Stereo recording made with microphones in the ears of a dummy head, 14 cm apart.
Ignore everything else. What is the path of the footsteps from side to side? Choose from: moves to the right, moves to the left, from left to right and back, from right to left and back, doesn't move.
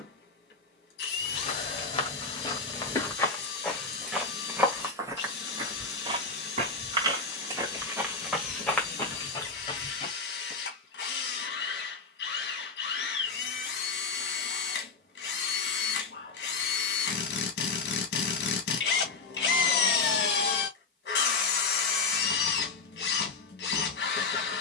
from left to right and back.